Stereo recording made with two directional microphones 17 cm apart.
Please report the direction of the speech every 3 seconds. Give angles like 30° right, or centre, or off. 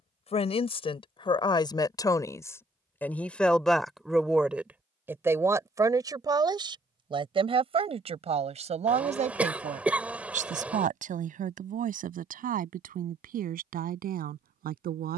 30° left, centre, 30° right, 50° right, 60° right.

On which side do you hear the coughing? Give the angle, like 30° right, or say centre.
10° right.